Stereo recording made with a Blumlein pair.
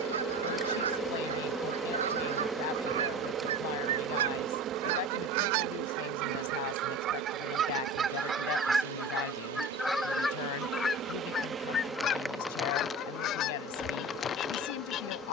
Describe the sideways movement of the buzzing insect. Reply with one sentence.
In this clip you hear the buzzing insect go right and come back.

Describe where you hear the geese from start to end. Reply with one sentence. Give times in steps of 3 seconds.
In this clip you hear the geese on the right from 0 s, in the centre from 9 s and on the left from 12 s.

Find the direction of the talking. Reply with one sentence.
You can hear the talking on the left.